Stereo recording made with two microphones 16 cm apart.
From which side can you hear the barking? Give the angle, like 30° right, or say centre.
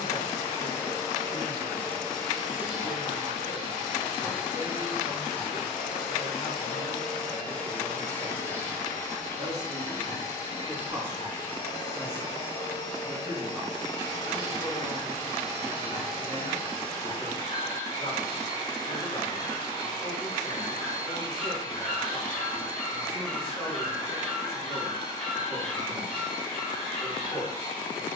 centre.